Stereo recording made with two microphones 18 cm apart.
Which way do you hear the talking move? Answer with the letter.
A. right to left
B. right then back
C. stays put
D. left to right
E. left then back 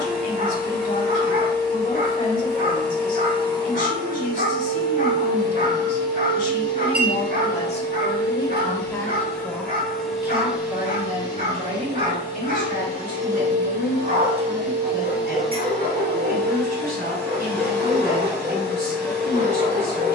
D.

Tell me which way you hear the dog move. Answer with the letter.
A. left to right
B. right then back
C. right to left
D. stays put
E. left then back
D.